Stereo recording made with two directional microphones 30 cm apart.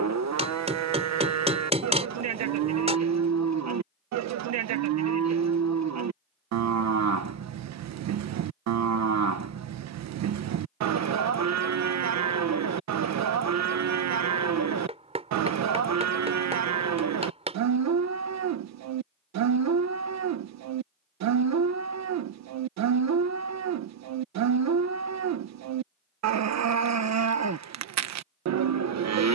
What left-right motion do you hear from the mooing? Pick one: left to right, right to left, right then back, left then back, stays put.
stays put.